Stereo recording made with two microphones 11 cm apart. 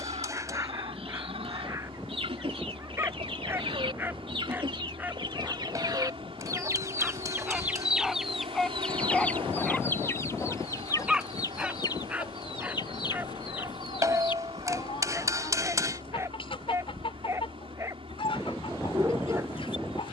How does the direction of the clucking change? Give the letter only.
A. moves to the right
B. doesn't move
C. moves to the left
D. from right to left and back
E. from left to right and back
C.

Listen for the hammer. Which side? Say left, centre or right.
right.